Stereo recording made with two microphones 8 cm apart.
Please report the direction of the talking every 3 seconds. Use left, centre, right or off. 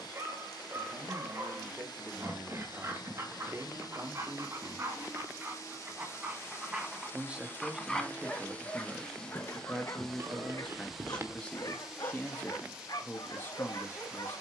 right, right, centre, centre, left.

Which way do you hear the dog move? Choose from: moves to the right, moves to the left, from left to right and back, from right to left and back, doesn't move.
moves to the left.